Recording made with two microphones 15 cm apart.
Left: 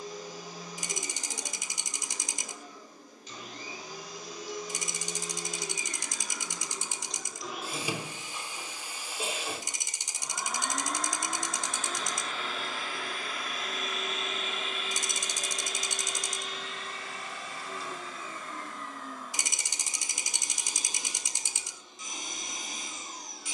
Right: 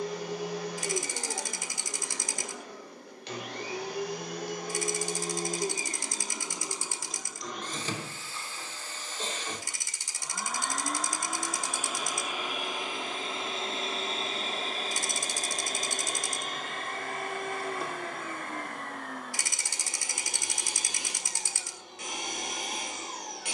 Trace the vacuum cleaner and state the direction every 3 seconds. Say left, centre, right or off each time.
right, right, centre, centre, right, right, right, right.